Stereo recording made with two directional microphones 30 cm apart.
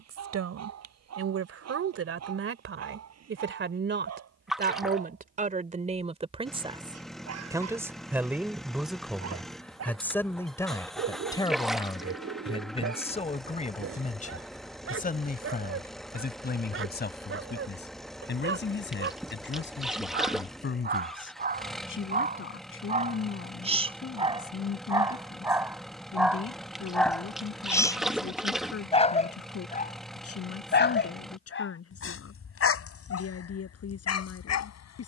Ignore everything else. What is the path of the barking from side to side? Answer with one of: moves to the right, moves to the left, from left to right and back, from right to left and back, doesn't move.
moves to the left.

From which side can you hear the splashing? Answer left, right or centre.
centre.